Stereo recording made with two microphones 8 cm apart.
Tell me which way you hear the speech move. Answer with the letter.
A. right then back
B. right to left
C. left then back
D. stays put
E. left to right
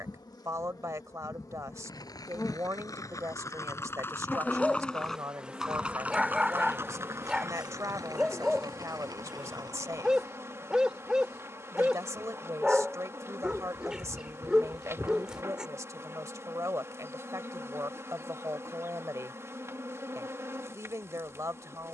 D.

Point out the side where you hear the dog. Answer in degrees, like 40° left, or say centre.
10° right.